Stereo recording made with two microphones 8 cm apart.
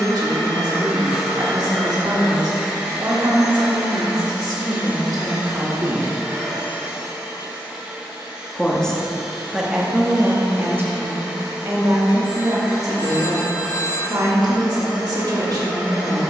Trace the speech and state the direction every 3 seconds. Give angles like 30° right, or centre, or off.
60° right, 50° right, centre, 20° right, 50° right, 50° right.